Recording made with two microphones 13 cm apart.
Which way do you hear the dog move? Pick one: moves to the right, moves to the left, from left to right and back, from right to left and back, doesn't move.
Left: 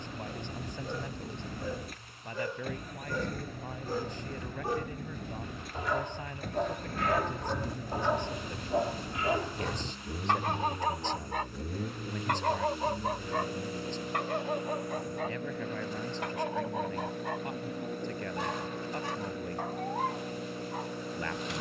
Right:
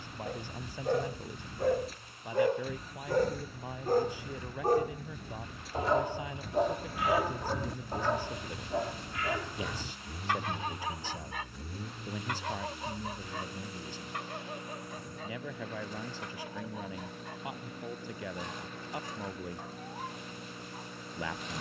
moves to the left.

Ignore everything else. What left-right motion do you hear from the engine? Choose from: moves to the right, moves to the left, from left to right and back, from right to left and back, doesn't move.
doesn't move.